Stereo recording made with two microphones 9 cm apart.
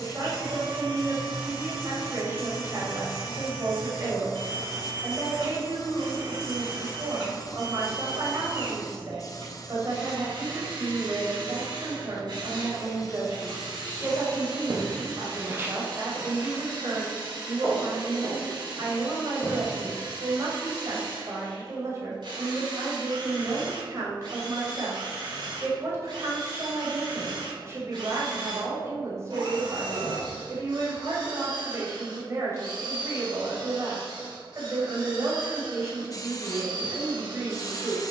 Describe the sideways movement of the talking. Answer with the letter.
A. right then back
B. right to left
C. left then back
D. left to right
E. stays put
E.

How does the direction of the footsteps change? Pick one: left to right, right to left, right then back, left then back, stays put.
right to left.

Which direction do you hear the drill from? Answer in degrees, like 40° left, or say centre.
70° right.